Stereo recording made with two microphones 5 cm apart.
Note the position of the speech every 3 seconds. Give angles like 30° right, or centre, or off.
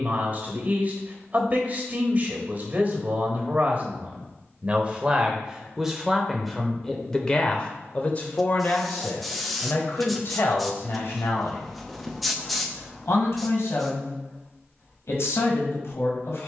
30° right, 30° right, 20° left, 60° left, 70° left, 70° left.